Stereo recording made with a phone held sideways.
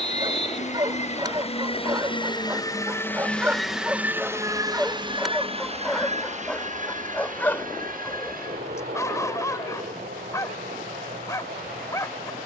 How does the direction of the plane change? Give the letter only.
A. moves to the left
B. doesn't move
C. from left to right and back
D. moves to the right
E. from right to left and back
D.